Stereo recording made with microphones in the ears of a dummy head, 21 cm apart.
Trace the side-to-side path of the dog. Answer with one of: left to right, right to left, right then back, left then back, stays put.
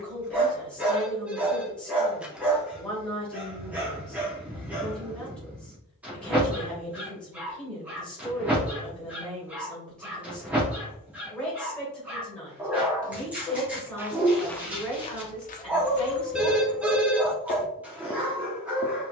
stays put.